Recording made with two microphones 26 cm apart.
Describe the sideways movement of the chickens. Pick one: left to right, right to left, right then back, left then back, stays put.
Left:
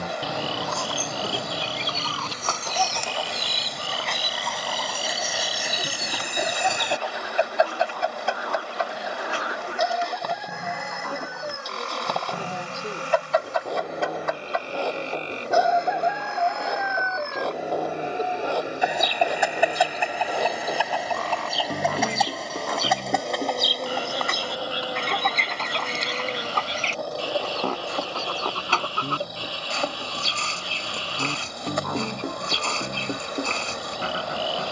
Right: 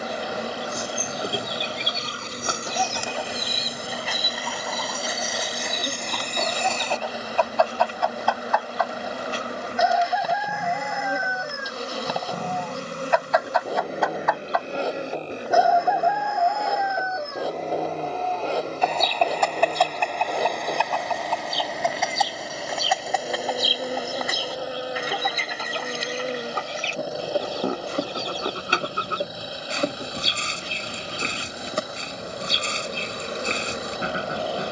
left then back.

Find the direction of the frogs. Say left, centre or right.
left.